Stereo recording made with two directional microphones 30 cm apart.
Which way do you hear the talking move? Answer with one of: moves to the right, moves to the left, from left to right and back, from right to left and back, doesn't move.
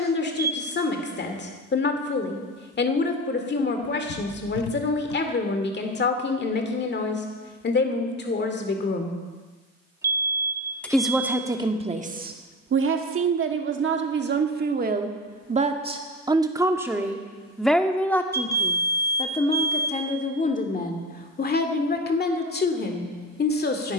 from left to right and back.